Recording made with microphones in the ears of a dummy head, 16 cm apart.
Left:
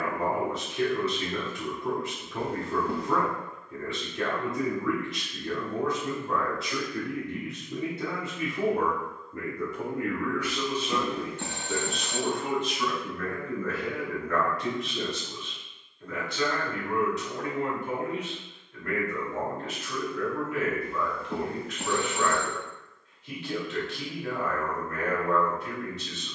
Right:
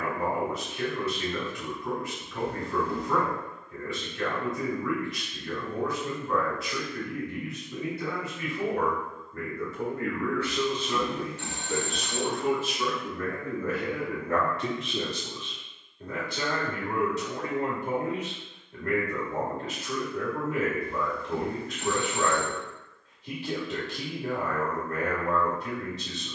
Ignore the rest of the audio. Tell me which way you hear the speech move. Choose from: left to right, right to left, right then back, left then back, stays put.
left to right.